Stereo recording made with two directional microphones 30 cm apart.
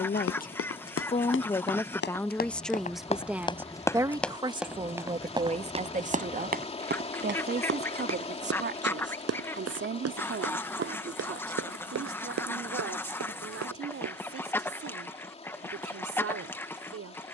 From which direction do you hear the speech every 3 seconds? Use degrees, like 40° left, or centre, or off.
10° left, 10° right, 30° right, 40° right, 50° right, 50° right.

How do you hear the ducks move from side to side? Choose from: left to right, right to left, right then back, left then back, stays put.
stays put.